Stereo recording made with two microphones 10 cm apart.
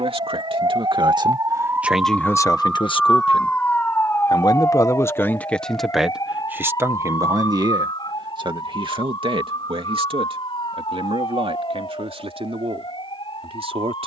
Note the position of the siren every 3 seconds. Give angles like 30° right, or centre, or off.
30° right, 20° left, 40° left, 50° left, 50° left.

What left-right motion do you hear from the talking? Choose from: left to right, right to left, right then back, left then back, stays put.
left then back.